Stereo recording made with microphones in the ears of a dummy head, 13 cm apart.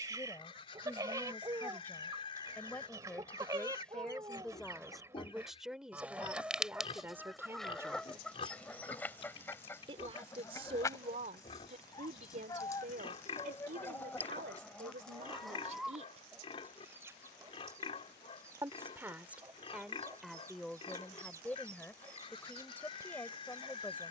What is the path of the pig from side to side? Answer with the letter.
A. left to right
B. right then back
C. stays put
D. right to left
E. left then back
C.